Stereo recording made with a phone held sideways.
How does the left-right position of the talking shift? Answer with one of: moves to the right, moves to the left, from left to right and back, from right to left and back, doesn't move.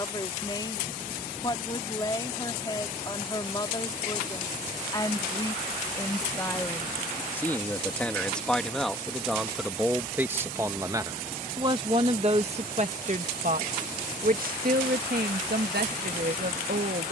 moves to the right.